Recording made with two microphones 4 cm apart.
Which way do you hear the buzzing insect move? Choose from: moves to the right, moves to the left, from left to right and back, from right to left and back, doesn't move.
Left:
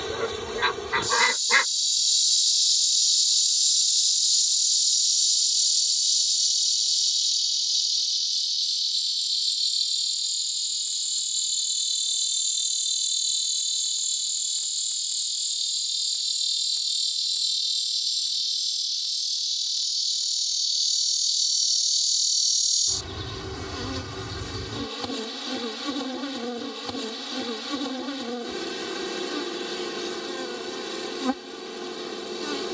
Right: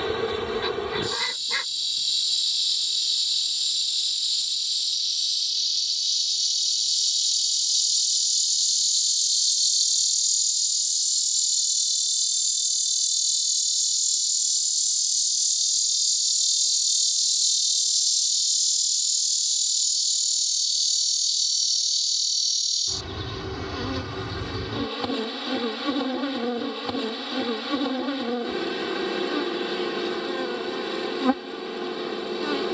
from right to left and back.